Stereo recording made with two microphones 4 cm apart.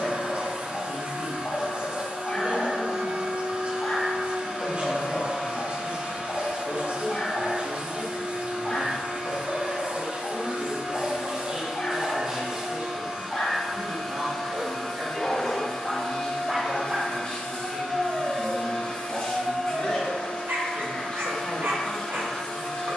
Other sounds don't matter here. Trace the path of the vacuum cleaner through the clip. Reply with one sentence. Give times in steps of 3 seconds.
You can hear the vacuum cleaner on the right from 0 s, in the centre from 12 s and on the left from 15 s.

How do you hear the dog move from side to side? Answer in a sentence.
In this clip you hear the dog move from left to right.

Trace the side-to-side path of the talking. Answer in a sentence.
You can hear the talking travel towards the left.